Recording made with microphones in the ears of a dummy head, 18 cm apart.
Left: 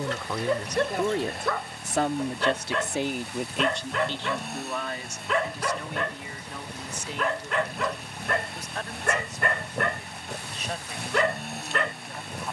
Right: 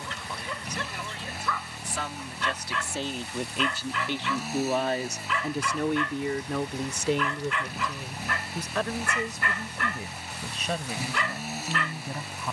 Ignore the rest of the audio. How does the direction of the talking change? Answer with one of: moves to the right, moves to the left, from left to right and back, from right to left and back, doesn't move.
moves to the right.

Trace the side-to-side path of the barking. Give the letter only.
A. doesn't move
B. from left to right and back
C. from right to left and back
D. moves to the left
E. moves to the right
A.